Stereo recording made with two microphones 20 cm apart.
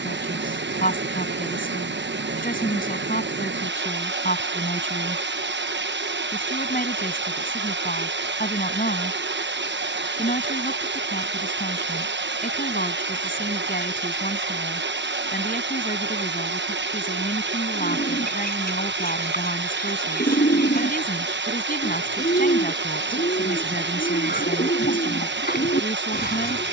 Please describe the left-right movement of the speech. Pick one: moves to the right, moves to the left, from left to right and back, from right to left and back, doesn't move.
doesn't move.